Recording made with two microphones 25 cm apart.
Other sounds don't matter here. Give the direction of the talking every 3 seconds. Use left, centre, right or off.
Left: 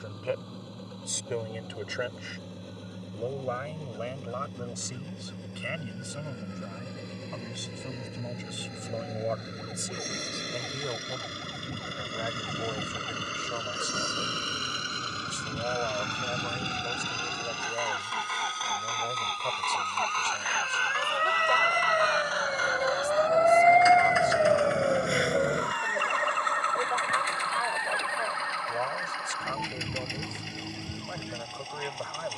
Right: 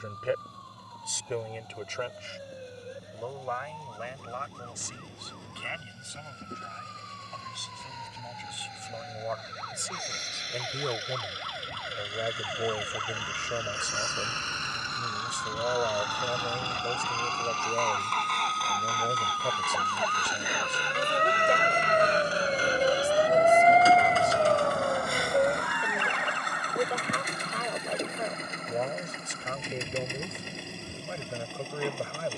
centre, left, left, centre, right, right, right, right, right, right, right.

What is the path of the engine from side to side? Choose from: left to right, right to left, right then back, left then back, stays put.
left to right.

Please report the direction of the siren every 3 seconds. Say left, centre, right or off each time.
right, right, right, right, right, right, right, right, left, left, left.